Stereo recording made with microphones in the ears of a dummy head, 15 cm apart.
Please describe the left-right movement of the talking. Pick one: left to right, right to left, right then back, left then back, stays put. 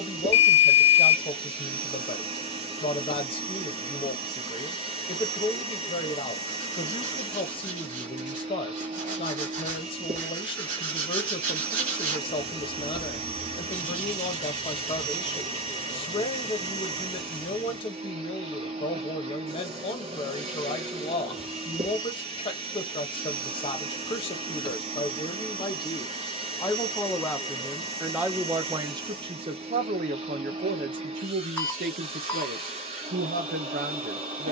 left to right.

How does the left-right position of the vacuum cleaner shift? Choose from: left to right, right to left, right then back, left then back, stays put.
stays put.